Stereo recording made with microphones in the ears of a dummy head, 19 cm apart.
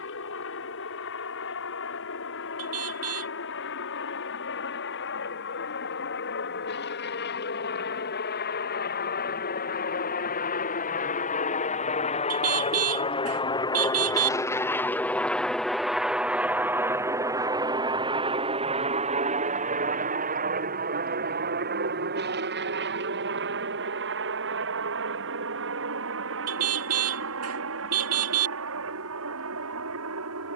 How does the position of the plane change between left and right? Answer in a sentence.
In this clip you hear the plane move from left to right.